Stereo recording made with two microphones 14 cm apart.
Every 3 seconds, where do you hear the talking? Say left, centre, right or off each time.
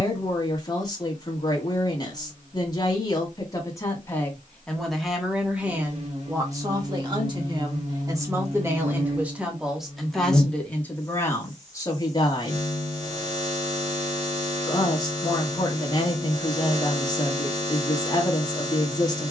left, centre, right, centre, left, left, left.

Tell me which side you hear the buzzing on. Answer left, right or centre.
right.